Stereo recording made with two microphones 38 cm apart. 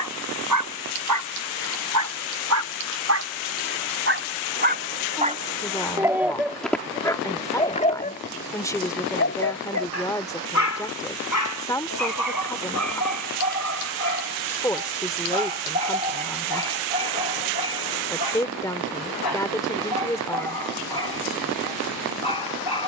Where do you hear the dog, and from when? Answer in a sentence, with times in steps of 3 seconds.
In this clip you hear the dog on the right from 0 s, in the centre from 6 s and on the left from 9 s.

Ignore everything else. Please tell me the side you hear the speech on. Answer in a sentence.
You can hear the speech in the centre.